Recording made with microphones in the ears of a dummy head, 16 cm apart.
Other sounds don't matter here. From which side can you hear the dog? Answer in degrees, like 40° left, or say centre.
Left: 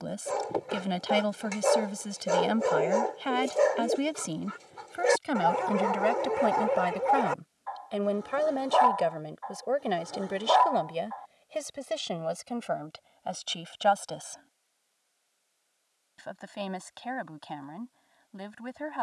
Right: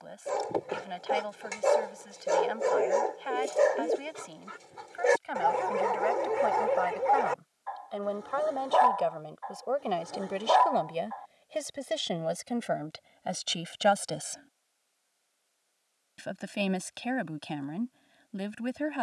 centre.